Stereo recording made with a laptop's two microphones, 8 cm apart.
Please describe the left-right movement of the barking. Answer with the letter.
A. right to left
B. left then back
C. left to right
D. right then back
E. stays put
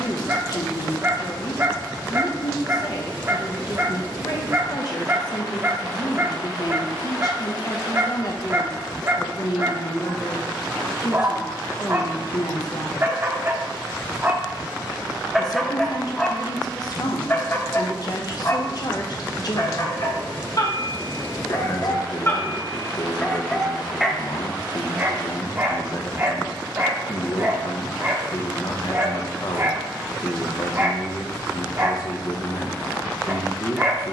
B.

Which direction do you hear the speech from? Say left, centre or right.
left.